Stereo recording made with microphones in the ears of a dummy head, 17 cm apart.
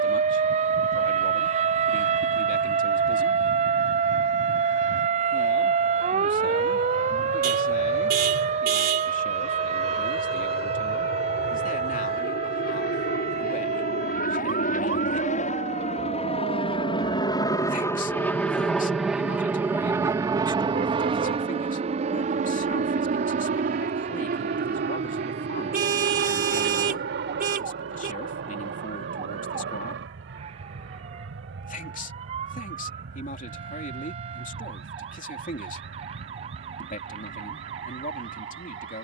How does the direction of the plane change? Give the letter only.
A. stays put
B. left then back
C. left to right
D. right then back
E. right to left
C.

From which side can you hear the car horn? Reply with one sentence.
You can hear the car horn on the right.